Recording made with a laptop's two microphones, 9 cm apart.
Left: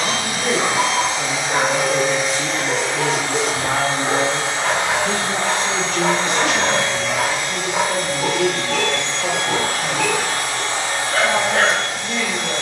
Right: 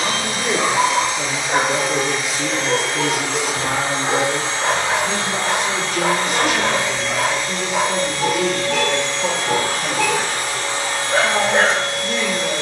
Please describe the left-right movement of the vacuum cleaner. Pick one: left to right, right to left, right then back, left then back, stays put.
stays put.